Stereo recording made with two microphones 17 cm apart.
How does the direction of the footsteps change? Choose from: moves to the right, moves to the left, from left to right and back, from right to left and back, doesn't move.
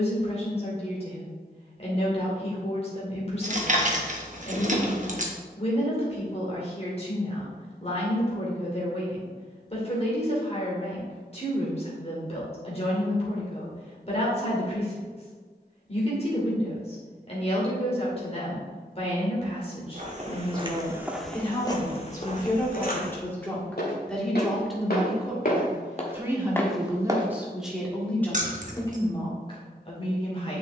from right to left and back.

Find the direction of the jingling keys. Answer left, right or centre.
right.